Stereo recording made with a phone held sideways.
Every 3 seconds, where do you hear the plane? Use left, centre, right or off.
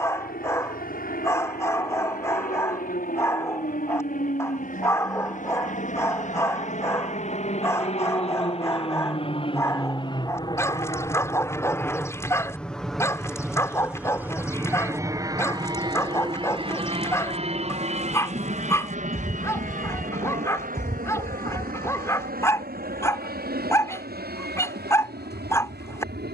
left, left, left, left, centre, right, right, right, right.